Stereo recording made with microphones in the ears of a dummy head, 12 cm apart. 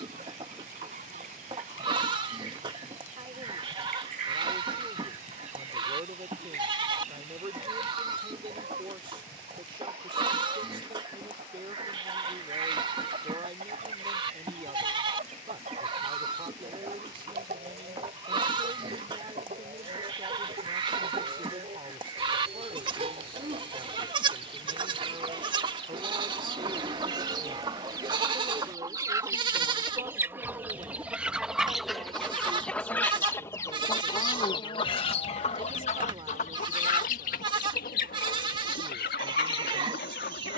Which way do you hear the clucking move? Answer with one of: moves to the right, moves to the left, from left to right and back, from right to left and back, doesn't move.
moves to the left.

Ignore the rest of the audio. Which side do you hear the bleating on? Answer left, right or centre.
right.